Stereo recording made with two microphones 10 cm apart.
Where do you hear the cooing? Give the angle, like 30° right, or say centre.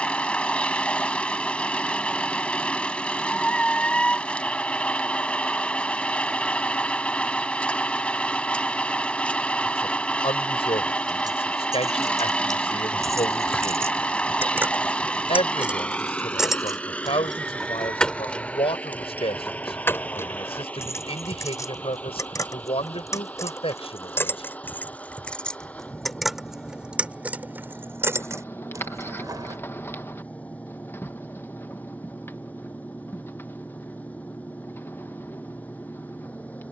20° left.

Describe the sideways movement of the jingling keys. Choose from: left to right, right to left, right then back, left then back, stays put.
left then back.